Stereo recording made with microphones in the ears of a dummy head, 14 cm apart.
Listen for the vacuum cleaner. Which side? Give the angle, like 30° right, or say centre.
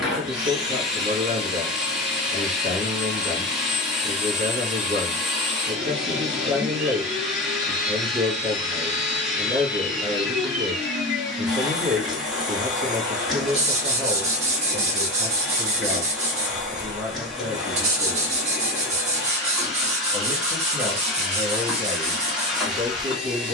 centre.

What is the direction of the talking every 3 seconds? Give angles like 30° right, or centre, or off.
40° right, 40° right, 40° right, 40° right, 40° right, 10° right, centre, 30° right.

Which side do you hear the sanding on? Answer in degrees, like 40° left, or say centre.
40° right.